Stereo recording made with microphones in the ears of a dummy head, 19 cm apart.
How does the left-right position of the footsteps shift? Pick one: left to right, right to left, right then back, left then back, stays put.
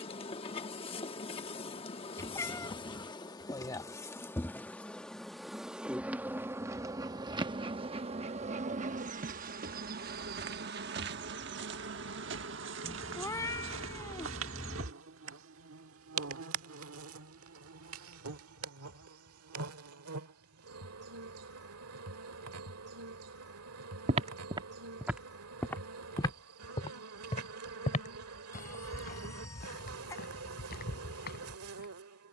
right to left.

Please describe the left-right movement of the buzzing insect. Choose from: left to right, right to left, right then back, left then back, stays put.
left to right.